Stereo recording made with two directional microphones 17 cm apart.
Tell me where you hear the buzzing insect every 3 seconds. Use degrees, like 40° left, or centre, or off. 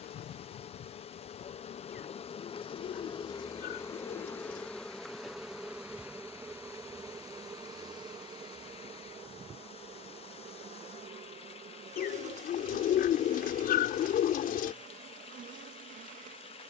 40° left, 10° left, 20° right, 40° right, 50° right, 50° right.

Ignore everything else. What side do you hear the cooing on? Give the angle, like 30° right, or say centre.
60° left.